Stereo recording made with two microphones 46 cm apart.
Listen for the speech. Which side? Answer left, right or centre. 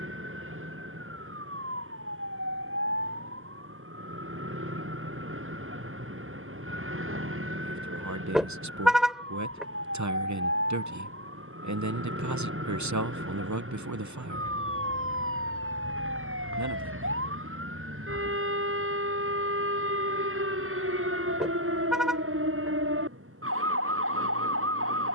right.